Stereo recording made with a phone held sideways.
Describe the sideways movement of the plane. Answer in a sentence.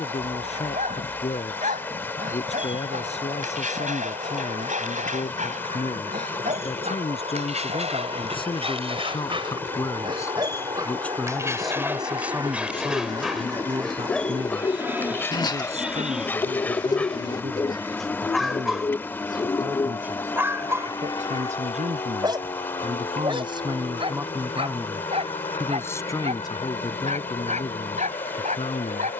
You can hear the plane go from the right side to the left.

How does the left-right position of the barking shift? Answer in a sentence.
In this clip you hear the barking move from right to left and back again.